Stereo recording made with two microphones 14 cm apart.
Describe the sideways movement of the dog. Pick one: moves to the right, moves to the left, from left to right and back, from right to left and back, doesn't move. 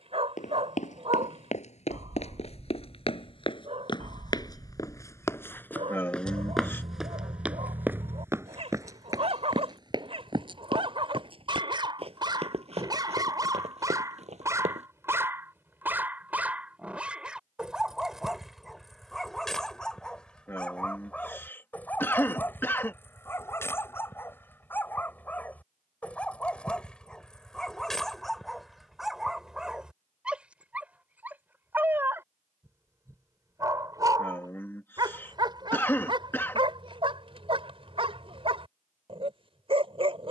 from right to left and back.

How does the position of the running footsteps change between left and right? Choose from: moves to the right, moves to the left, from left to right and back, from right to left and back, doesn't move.
moves to the right.